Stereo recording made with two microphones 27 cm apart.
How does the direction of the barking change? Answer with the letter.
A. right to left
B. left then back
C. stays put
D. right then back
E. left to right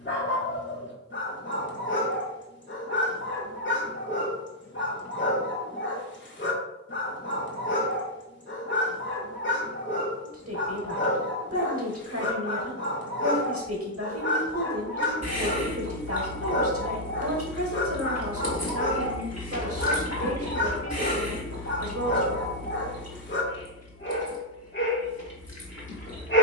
C.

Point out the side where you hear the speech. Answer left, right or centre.
right.